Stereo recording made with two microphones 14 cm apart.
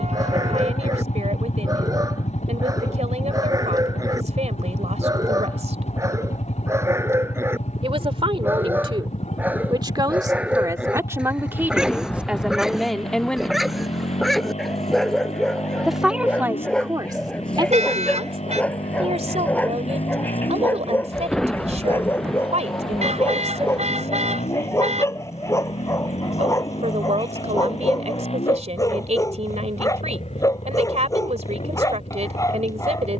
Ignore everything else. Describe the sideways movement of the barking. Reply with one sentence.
You can hear the barking move to the left.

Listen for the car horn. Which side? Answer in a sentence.
You can hear the car horn on the right.